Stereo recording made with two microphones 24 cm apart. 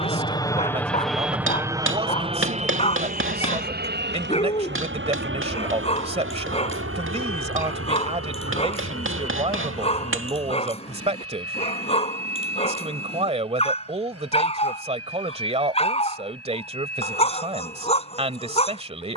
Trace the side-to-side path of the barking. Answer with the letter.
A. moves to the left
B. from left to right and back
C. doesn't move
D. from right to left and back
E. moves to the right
C.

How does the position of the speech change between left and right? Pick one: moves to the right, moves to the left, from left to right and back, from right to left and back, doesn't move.
doesn't move.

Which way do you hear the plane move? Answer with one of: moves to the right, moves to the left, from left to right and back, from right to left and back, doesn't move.
moves to the right.